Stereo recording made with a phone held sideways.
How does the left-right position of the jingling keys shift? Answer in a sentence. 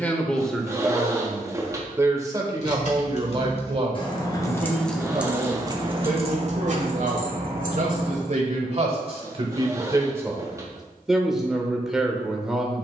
You can hear the jingling keys travel towards the right.